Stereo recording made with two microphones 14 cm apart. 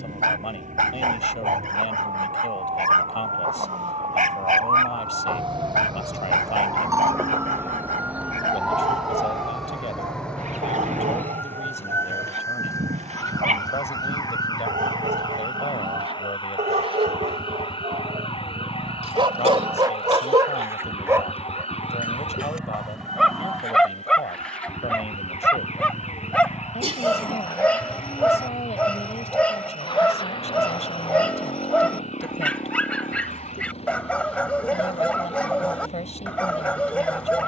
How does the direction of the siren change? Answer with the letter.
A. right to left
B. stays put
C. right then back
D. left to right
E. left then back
A.